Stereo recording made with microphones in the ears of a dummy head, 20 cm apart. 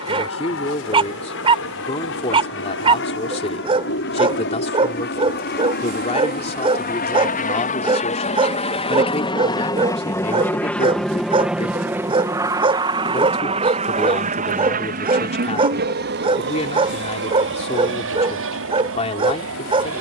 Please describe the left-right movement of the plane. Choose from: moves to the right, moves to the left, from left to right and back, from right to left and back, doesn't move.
moves to the right.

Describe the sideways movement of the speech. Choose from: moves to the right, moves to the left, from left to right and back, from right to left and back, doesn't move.
doesn't move.